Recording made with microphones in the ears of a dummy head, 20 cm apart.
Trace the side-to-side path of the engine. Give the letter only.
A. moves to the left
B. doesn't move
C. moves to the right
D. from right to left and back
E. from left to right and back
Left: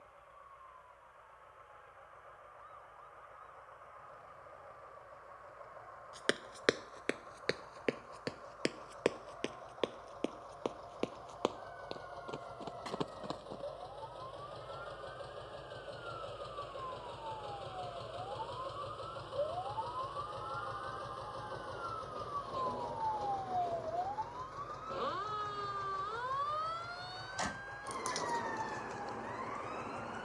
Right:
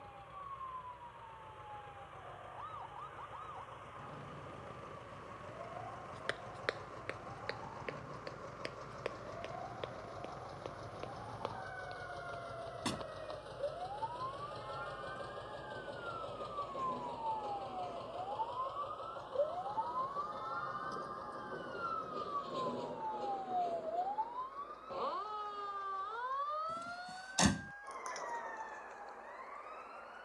A.